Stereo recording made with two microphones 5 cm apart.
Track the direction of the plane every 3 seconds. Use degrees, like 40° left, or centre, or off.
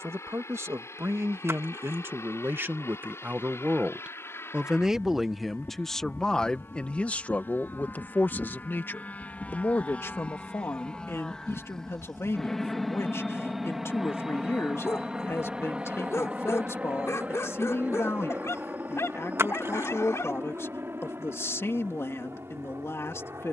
60° left, 50° left, 40° left, 20° left, centre, 20° right, 40° right, 50° right.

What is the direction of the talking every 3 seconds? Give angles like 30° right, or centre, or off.
50° right, 20° right, 30° left, 50° left, 60° left, 60° left, 60° left, 60° left.